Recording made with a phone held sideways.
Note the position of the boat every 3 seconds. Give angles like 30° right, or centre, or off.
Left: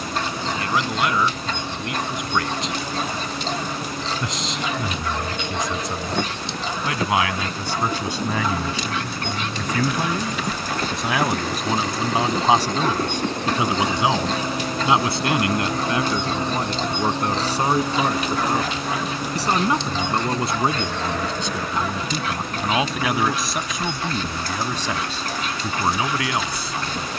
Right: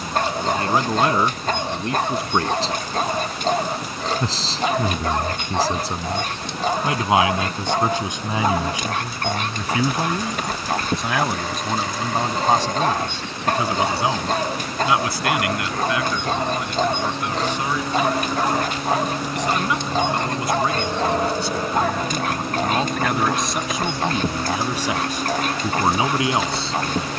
80° left, 80° left, 70° left, 60° left, 50° left, 20° left, 10° right, 30° right, 50° right.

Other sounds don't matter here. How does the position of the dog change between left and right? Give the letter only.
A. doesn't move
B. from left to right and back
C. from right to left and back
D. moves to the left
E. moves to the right
A.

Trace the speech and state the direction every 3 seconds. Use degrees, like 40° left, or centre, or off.
30° right, 30° right, 20° right, centre, 20° left, 30° left, 40° left, 10° left, 20° right.